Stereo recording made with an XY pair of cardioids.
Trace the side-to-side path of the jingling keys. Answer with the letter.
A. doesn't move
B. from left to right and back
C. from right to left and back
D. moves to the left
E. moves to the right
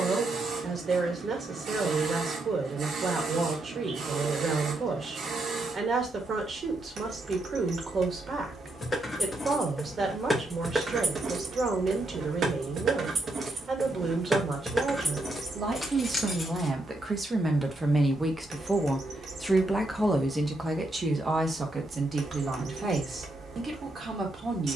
B.